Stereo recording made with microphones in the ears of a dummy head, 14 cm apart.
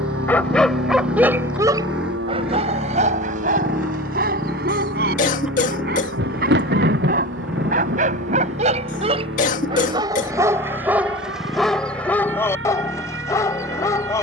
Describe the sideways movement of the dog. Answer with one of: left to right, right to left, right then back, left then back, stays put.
right then back.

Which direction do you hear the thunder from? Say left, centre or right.
right.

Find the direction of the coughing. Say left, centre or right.
left.